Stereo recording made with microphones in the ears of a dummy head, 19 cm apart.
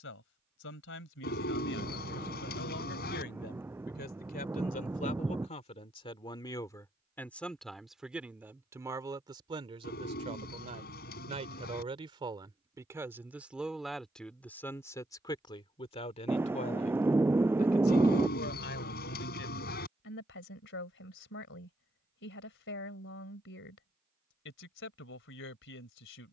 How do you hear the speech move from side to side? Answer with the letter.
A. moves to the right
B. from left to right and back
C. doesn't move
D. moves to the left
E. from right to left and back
B.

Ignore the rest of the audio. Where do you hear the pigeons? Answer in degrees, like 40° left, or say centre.
50° left.